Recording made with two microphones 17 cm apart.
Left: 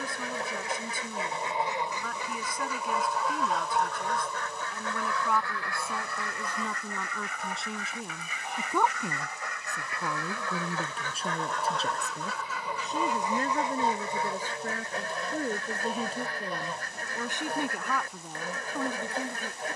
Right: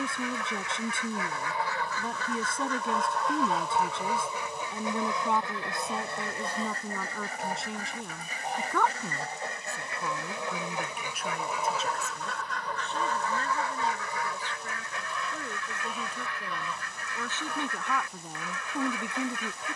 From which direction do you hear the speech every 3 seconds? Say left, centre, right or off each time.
right, right, centre, left, left, left, centre.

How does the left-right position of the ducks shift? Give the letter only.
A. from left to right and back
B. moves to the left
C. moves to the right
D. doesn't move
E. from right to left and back
A.